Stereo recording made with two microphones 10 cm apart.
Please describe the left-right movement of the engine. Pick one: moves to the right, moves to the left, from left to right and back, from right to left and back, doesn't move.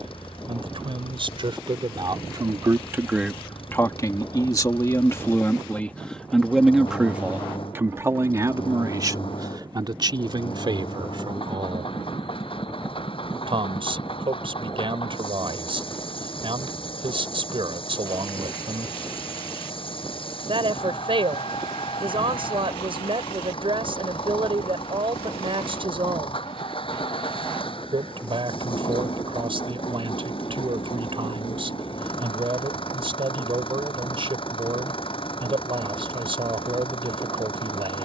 doesn't move.